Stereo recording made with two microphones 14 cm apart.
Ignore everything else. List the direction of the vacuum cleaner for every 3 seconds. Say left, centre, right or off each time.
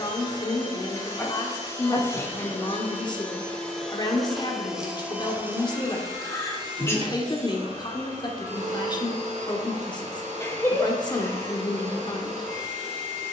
left, centre, right, right, right.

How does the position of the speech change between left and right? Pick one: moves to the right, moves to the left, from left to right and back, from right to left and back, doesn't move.
doesn't move.